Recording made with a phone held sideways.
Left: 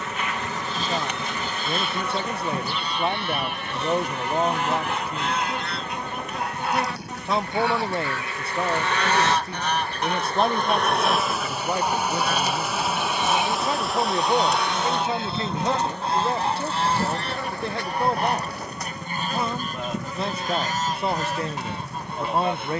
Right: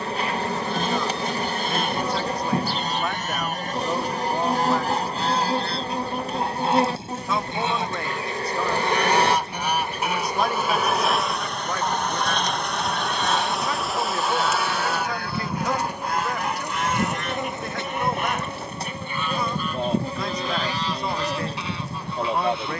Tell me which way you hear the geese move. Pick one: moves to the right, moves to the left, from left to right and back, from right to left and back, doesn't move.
moves to the left.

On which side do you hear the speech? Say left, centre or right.
left.